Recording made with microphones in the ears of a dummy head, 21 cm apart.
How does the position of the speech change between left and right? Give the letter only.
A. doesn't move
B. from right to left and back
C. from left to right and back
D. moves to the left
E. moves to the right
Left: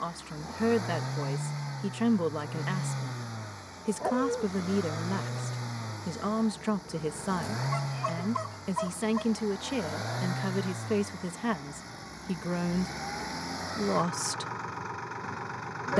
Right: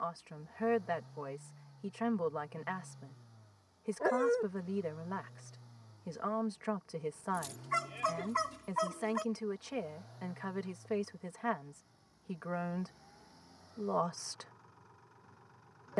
A.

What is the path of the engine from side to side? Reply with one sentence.
In this clip you hear the engine stay in one place.